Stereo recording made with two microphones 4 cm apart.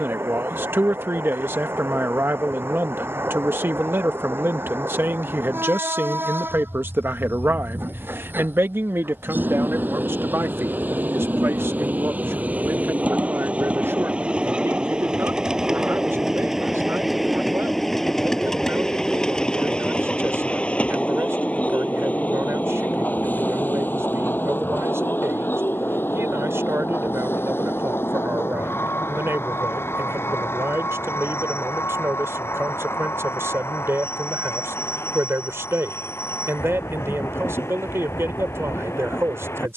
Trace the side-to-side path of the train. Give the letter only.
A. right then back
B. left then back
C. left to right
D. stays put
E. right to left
E.